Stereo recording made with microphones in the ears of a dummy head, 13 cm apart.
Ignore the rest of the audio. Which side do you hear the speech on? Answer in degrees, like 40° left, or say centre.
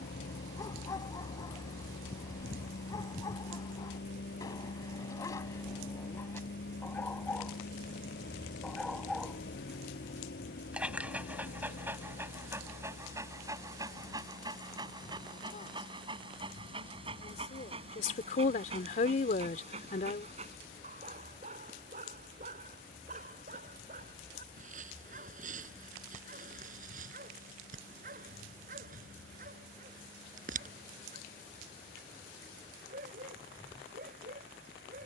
60° left.